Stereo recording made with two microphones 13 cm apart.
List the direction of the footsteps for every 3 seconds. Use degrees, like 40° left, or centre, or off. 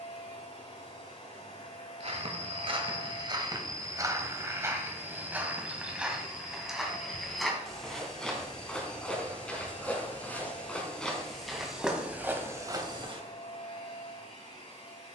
50° right, 20° right, centre, 10° left, 30° right.